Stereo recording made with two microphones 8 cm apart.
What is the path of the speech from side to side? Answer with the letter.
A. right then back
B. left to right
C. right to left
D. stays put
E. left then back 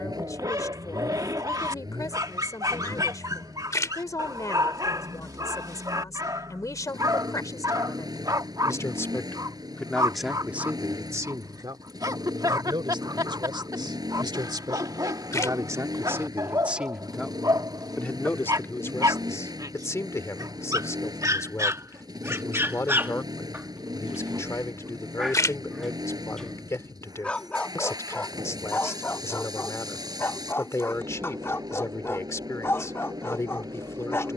A.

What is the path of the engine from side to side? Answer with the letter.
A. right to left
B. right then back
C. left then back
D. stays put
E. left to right
D.